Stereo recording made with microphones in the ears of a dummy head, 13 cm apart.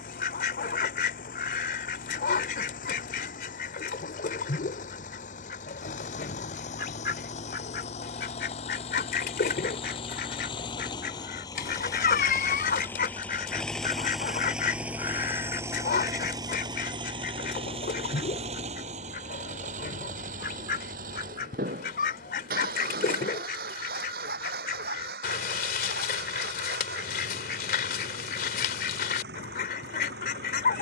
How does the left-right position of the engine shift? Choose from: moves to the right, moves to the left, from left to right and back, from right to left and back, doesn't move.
moves to the right.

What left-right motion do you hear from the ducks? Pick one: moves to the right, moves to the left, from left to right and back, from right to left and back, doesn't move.
doesn't move.